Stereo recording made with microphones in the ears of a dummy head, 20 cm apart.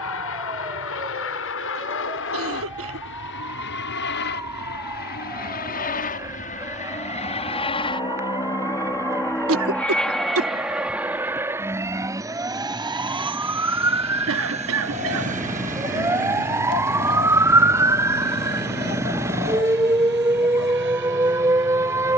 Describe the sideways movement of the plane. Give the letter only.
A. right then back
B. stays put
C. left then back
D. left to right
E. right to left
D.